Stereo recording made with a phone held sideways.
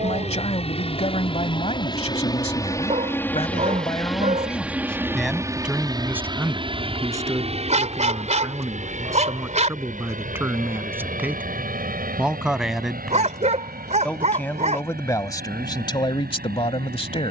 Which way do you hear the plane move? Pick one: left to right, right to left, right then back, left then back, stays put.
left to right.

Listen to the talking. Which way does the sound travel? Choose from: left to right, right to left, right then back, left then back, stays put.
right then back.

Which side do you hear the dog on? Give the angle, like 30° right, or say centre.
50° right.